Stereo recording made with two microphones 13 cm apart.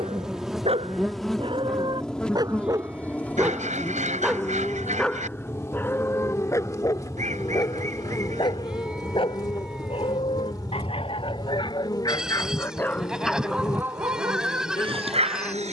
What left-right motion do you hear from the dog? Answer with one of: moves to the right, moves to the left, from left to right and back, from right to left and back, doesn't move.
from right to left and back.